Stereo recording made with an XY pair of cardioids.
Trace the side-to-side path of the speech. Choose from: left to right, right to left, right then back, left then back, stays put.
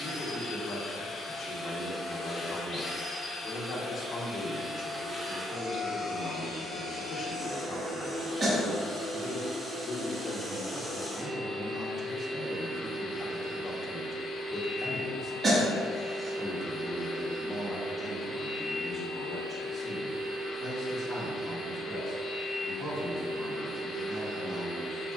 left to right.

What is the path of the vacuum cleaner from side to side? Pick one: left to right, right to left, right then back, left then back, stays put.
right then back.